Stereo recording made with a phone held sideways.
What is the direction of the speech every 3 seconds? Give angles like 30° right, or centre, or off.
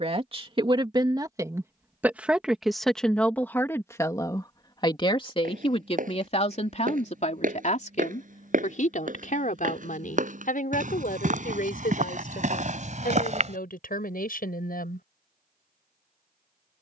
20° right, 20° left, 50° left, 60° left, 70° left, off.